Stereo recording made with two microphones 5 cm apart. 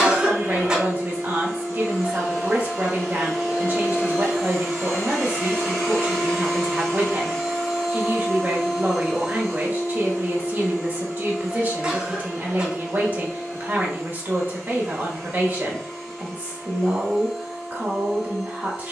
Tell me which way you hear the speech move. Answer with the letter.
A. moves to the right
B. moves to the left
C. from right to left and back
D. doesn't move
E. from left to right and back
D.